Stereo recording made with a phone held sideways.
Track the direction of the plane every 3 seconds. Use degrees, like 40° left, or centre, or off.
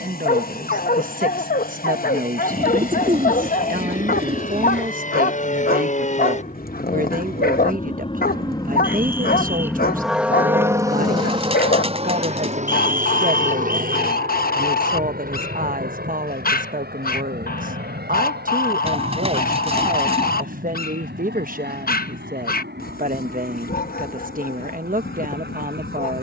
70° left, 60° left, 40° left, 10° right, 50° right, 70° right, 70° right, 80° right, 80° right.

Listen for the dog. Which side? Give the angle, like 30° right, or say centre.
70° left.